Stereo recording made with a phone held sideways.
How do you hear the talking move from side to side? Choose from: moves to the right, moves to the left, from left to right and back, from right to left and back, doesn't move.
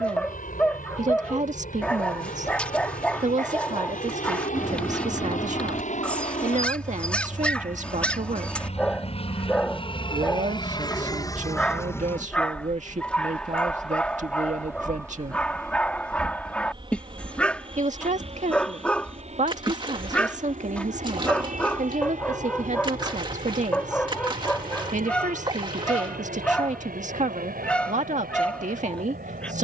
doesn't move.